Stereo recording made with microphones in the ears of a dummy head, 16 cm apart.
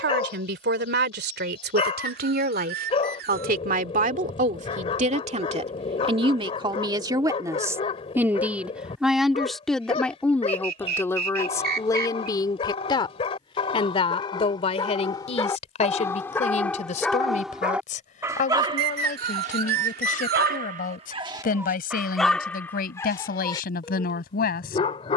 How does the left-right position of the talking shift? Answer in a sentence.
You can hear the talking travel towards the left.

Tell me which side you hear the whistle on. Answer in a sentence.
You can hear the whistle on the right.